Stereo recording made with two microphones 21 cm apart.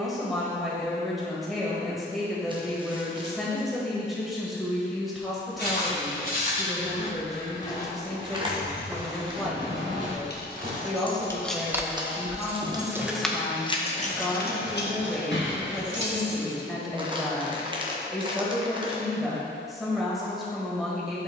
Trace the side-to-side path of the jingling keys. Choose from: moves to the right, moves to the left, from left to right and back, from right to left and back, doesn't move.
from left to right and back.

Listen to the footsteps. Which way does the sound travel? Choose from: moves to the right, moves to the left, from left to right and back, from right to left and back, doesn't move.
moves to the right.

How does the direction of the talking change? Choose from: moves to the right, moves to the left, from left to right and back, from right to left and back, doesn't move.
doesn't move.